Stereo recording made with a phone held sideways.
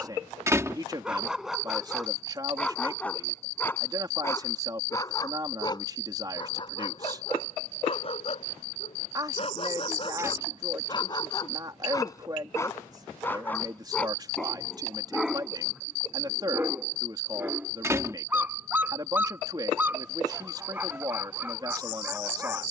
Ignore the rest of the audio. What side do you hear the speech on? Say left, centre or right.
right.